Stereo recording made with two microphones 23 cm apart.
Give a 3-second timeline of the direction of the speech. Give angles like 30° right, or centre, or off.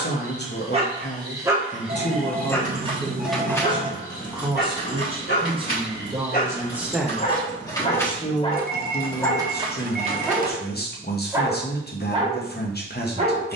40° left, 10° right, 10° left, 40° left, 40° left.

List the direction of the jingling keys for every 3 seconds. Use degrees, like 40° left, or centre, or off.
30° right, 30° left, 20° left, 20° right, off.